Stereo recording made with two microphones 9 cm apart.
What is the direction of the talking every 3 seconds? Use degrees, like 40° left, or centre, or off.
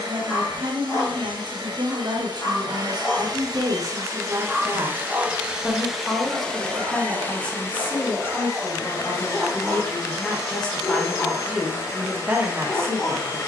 50° right, 30° right, 10° left, 10° left, 30° right.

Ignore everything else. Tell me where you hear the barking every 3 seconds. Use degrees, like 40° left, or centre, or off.
40° left, centre, 30° right, 20° left, 40° left.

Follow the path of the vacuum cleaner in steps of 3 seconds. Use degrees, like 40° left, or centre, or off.
60° right, 30° right, 20° left, 30° left, 30° left.